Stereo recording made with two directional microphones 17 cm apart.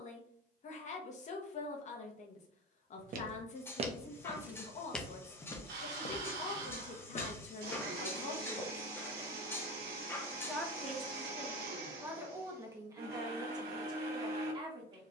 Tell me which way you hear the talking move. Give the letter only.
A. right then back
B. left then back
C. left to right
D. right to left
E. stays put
C.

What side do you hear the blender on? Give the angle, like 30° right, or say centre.
70° right.